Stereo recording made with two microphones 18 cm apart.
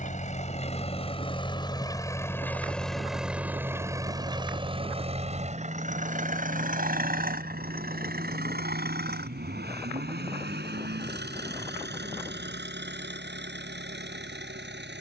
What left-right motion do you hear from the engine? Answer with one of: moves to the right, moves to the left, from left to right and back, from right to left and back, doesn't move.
moves to the right.